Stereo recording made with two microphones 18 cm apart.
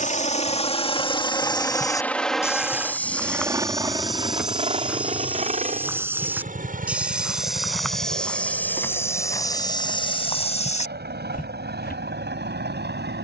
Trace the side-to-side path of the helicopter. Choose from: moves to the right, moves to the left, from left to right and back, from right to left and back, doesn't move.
moves to the right.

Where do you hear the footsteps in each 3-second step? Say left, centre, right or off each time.
left, centre, centre, left, off.